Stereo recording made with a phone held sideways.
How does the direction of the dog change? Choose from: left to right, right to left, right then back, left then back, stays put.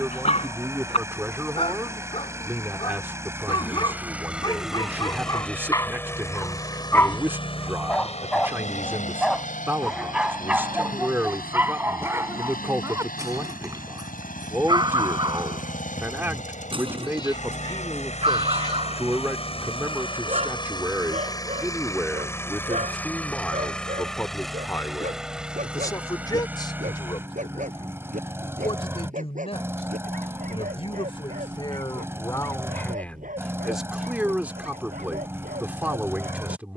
left to right.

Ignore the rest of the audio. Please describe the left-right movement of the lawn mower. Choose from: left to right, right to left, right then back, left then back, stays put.
left then back.